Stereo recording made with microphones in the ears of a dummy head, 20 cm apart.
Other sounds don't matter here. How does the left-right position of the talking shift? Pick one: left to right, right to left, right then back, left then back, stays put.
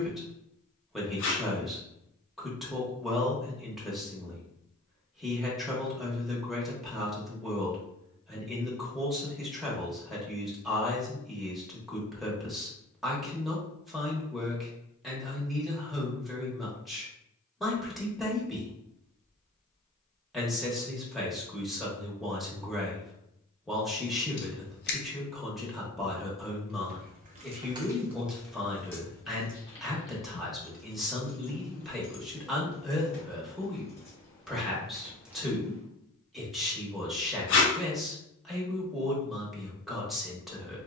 stays put.